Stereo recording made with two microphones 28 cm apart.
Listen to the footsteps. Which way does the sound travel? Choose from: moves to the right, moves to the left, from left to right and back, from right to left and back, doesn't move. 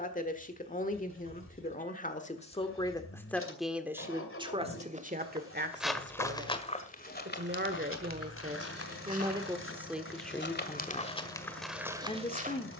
from right to left and back.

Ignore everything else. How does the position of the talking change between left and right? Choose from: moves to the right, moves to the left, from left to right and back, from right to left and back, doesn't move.
from left to right and back.